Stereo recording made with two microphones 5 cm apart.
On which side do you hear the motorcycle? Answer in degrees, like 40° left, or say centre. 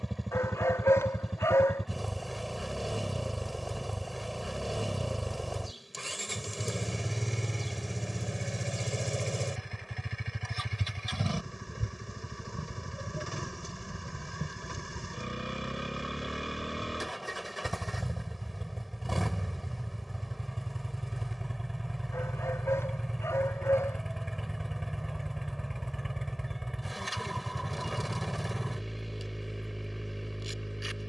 centre.